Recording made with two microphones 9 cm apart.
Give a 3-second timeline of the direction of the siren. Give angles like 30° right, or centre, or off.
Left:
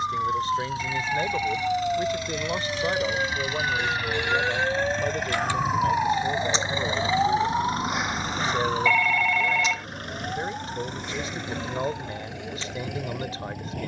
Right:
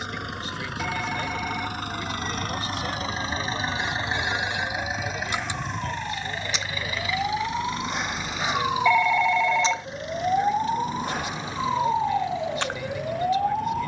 70° left, 50° left, 10° left, 40° right, 60° right.